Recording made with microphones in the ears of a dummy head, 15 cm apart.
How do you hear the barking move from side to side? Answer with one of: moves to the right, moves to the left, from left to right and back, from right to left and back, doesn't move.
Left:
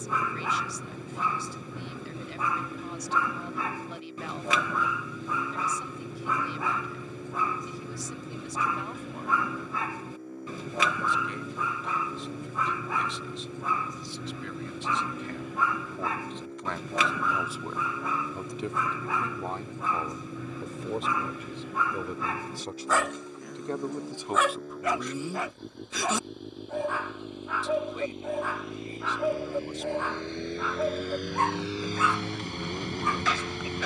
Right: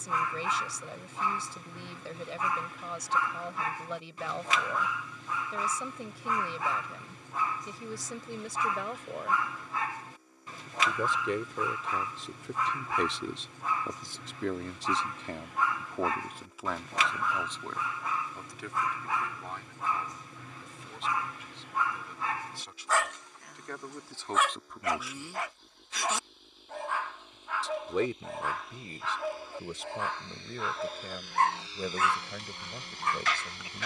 doesn't move.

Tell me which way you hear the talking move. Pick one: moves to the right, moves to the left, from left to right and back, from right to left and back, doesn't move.
from right to left and back.